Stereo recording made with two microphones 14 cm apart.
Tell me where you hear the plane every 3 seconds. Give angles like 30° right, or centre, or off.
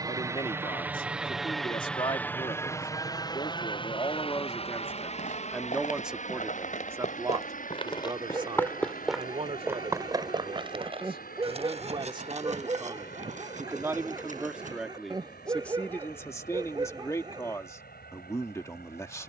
centre, 40° left, 60° left, 70° left, 70° left, 80° left, 80° left.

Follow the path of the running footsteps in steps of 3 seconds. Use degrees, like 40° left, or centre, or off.
off, 70° left, 40° left, 30° right, 60° right, off, off.